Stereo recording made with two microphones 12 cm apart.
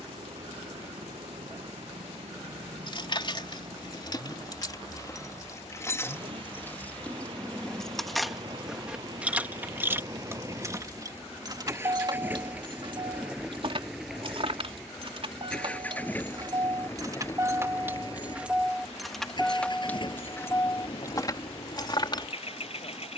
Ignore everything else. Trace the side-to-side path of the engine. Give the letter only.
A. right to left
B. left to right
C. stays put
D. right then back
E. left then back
A.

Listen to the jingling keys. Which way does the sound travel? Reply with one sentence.
You can hear the jingling keys move from left to right and back again.